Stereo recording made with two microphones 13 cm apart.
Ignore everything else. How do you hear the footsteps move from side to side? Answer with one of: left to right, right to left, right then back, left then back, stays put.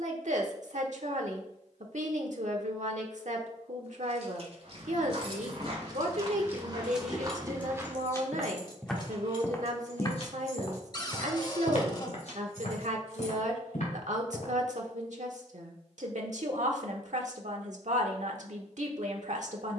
right to left.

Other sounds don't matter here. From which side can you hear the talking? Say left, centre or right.
right.